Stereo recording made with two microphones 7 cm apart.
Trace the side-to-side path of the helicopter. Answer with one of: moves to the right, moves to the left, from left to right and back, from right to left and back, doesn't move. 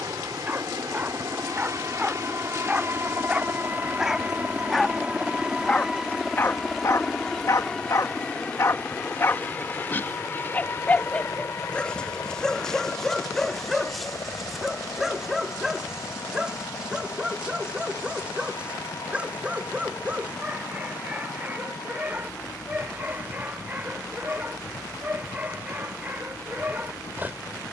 moves to the left.